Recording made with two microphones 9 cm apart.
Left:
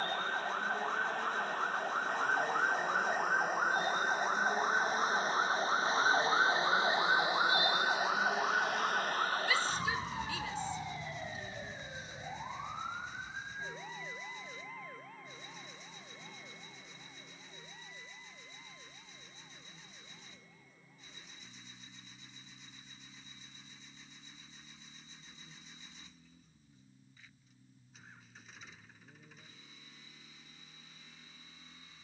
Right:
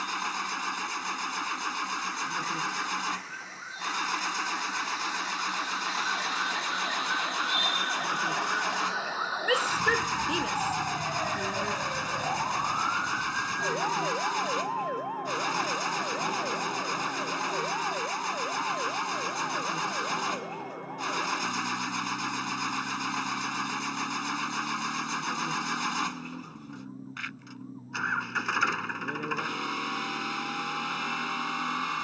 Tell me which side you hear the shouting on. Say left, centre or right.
right.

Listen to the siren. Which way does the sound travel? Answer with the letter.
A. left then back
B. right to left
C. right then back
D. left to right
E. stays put
D.